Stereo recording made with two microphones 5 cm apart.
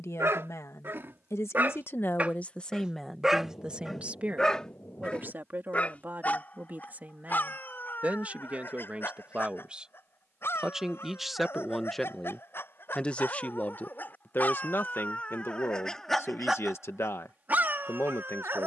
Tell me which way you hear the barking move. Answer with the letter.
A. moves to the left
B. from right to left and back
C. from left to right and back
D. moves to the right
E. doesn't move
B.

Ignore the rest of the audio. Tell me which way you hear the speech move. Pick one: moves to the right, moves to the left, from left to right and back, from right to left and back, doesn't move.
from left to right and back.